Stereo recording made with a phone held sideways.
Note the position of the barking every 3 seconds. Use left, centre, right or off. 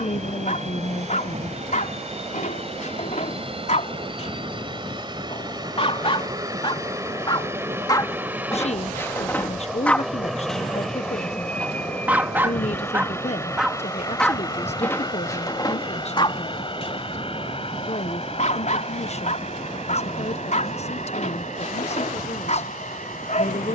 left, left, left, centre, centre, left, left, left.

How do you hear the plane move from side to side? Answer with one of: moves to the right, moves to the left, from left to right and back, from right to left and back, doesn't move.
moves to the left.